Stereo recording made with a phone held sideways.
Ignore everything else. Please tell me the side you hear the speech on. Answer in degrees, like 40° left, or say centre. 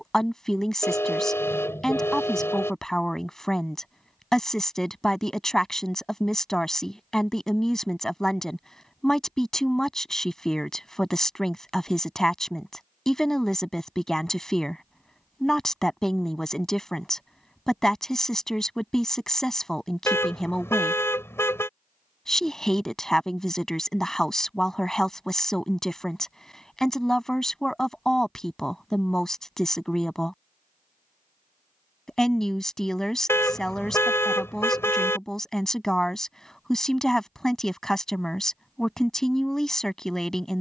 centre.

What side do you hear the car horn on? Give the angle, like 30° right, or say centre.
20° left.